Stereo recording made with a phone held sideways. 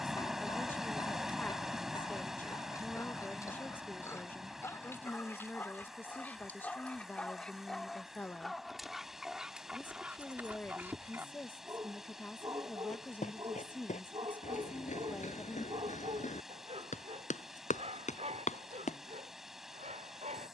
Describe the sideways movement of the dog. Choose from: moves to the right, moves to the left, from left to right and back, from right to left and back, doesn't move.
moves to the right.